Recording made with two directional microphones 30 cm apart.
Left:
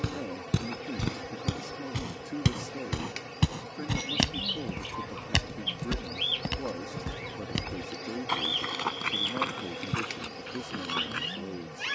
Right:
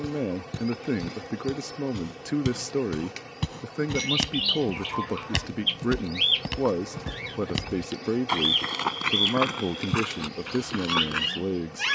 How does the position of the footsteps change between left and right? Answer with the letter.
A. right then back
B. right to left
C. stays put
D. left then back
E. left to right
E.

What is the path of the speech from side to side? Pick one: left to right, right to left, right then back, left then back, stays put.
stays put.